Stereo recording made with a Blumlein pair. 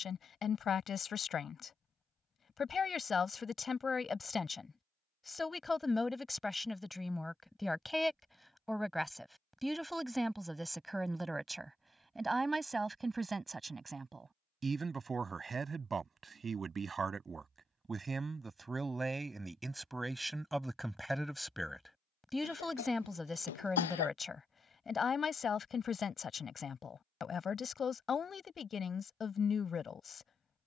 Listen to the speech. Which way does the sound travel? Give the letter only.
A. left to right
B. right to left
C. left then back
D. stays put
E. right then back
E.